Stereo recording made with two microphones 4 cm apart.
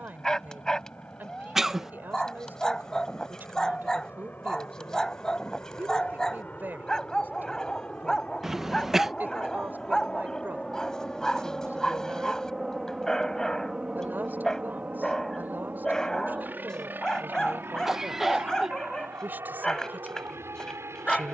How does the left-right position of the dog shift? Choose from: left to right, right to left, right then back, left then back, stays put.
stays put.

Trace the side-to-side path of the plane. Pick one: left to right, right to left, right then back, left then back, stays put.
left to right.